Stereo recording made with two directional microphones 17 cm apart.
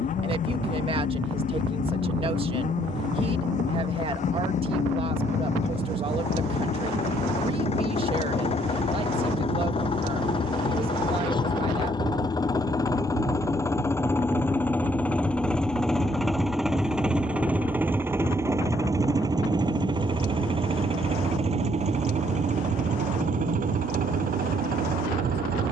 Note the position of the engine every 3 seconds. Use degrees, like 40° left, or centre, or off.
50° left, 50° left, 40° left, 30° left, 20° left, centre, 20° right, 40° right, 60° right.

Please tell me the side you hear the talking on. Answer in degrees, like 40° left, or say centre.
30° right.